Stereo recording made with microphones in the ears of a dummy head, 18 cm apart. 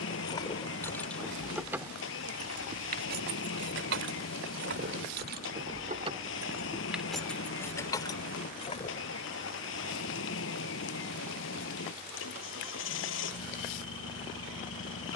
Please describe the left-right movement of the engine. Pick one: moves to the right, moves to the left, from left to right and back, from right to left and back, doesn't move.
doesn't move.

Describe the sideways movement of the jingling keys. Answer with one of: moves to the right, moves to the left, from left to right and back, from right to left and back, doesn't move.
from left to right and back.